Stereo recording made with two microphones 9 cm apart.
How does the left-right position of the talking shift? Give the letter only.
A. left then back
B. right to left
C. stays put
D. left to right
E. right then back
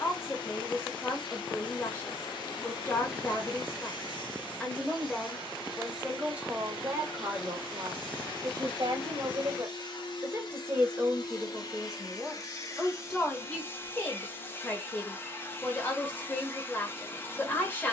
E.